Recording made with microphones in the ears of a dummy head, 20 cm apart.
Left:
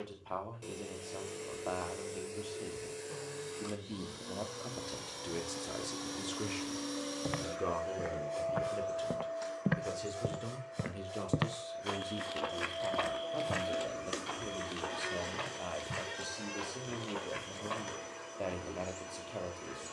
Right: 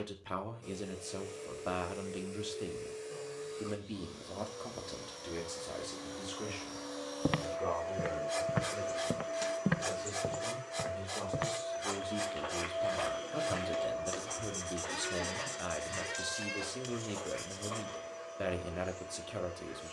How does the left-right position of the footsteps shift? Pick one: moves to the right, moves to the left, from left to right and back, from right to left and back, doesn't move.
moves to the left.